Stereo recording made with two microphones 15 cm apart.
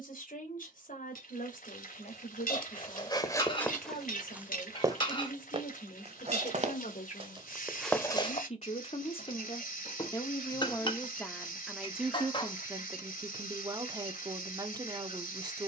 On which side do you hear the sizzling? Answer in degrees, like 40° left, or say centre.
70° left.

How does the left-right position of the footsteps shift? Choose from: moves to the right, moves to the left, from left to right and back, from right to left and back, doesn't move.
from left to right and back.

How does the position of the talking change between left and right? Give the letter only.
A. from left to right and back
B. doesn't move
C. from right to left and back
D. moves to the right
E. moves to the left
D.